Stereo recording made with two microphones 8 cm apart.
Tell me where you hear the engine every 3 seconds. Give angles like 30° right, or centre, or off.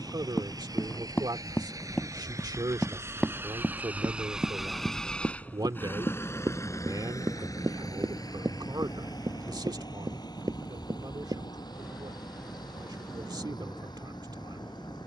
50° right, centre, 50° left, 70° left, 80° left.